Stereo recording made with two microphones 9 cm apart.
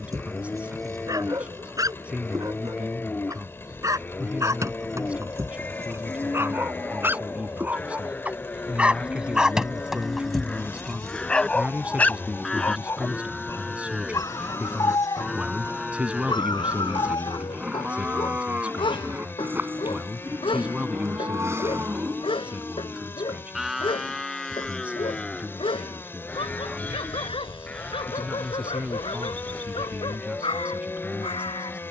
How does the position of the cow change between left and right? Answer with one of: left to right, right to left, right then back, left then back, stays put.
right then back.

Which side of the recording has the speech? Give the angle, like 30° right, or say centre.
10° right.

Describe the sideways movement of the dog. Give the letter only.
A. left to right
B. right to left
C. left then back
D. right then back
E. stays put
B.